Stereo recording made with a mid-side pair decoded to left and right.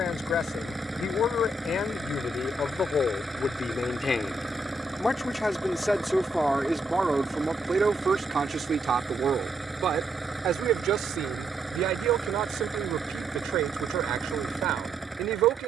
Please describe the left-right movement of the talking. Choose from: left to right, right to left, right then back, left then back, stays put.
left to right.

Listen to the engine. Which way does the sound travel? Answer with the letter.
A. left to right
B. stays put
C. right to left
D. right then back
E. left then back
B.